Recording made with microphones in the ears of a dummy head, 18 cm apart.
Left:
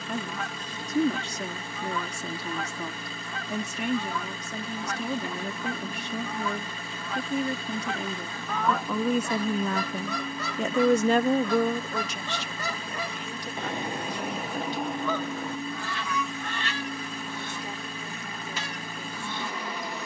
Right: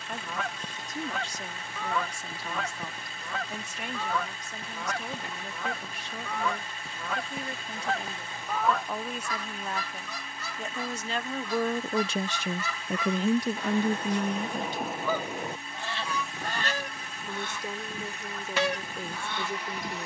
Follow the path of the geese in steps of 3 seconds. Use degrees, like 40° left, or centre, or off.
50° right, 50° right, 30° right, 40° left, 20° left, 30° right, 50° right.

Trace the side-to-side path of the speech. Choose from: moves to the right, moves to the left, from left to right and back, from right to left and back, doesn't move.
moves to the right.